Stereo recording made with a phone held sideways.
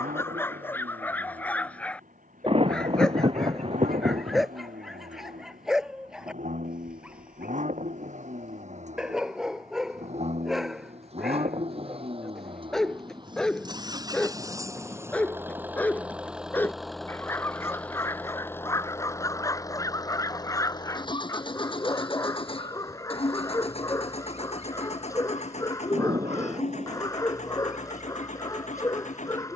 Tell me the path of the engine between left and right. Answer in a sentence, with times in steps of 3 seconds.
You can hear the engine on the right from 0 s, in the centre from 15 s and on the left from 18 s.